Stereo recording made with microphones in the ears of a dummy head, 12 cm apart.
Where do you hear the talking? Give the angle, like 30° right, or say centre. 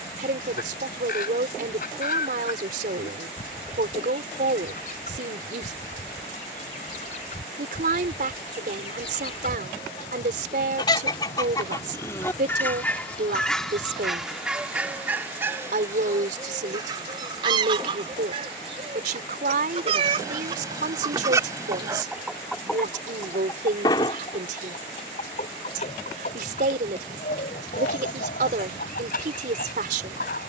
70° right.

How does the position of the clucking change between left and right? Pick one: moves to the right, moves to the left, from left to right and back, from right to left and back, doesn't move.
from left to right and back.